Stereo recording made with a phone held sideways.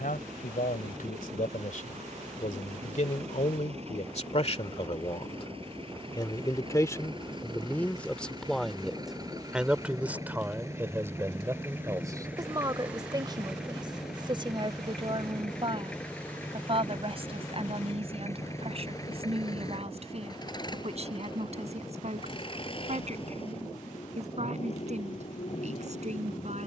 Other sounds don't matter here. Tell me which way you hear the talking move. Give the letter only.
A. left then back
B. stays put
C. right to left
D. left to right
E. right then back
D.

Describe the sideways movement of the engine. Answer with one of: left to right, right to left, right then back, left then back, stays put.
right to left.